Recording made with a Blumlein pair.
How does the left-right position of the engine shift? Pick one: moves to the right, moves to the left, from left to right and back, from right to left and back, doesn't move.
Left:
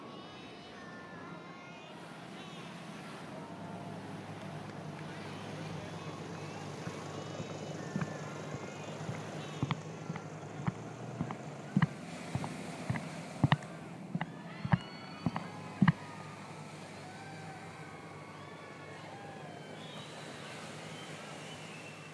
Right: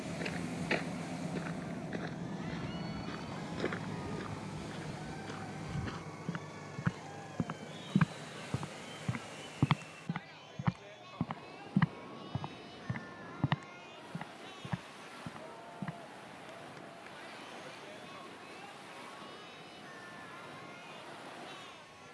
moves to the left.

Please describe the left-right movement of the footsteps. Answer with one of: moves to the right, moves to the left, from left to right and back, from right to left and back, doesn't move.
moves to the left.